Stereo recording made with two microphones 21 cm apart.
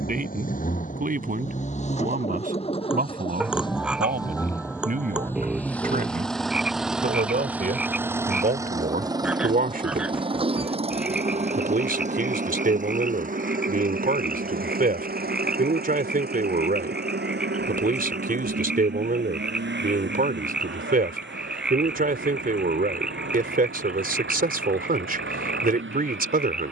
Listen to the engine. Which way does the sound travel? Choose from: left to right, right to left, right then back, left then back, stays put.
left to right.